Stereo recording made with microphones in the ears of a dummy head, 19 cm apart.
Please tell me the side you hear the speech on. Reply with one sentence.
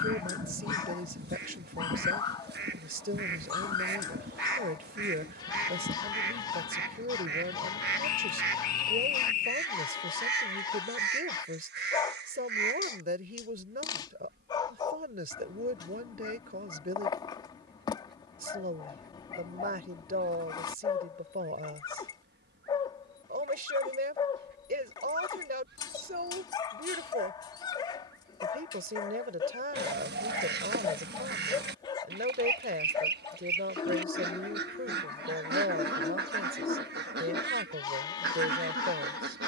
In this clip you hear the speech on the right.